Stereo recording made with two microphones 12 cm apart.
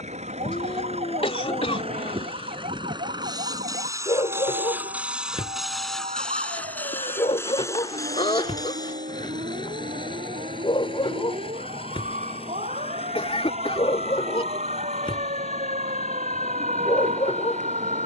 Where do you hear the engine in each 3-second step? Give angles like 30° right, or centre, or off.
50° right, 20° right, 20° left, 40° left, 50° left, 60° left.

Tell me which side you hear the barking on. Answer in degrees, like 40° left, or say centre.
50° left.